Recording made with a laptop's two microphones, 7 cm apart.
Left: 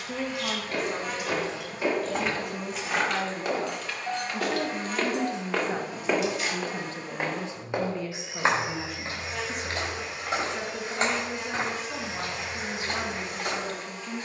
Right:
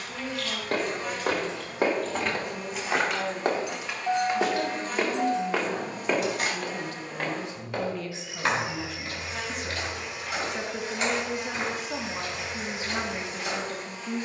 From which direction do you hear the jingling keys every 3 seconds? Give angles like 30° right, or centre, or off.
10° left, 30° right, 50° right, off, off.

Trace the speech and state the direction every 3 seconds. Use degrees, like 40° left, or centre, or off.
60° left, 50° left, 20° left, 10° right, 20° right.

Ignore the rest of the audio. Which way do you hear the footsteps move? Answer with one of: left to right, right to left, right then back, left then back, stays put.
right to left.